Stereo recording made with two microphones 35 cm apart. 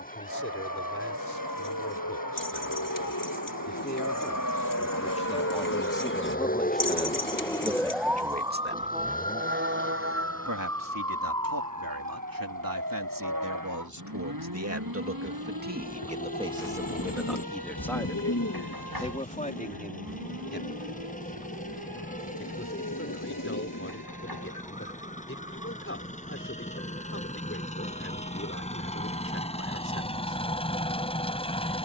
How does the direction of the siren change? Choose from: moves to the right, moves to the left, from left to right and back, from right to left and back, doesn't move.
moves to the right.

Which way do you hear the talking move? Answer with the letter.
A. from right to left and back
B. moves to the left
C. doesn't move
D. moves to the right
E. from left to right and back
E.